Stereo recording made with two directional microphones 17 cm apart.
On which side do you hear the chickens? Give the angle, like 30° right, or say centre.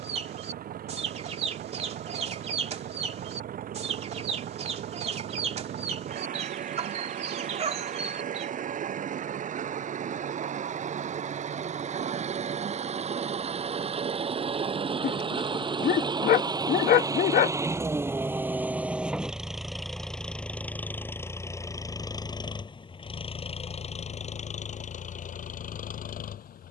40° right.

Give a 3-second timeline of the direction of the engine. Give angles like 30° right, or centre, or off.
60° right, 50° right, 50° right, 50° right, 40° right, 20° right, centre, 30° left, 50° left.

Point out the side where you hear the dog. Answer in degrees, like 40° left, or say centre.
50° left.